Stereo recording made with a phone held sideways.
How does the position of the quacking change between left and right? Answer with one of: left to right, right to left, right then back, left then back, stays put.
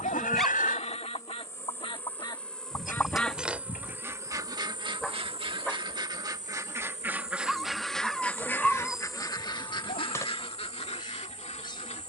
right then back.